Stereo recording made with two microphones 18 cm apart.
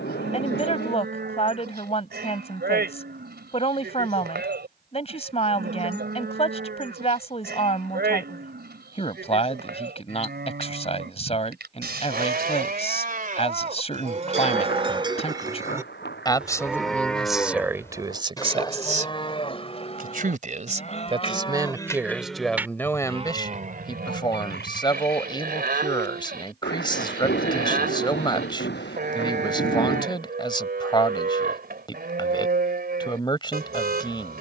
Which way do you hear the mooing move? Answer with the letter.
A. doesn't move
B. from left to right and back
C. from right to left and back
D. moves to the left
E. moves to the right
C.